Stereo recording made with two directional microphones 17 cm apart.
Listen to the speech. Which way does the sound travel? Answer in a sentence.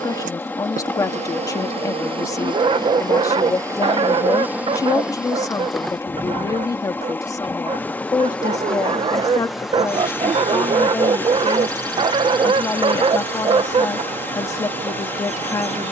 You can hear the speech stay in one place.